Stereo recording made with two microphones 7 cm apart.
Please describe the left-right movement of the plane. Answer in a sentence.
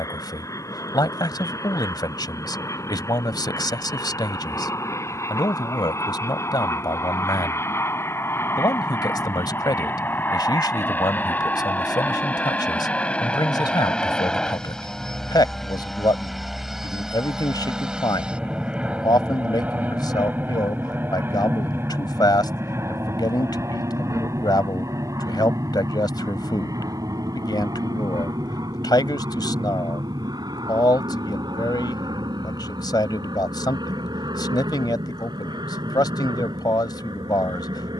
In this clip you hear the plane move from left to right.